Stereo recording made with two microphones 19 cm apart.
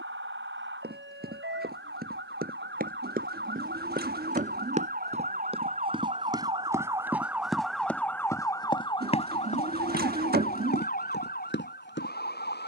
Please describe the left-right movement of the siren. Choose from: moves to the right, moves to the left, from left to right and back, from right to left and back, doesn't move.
moves to the left.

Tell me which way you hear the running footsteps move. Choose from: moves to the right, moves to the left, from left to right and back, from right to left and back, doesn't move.
moves to the left.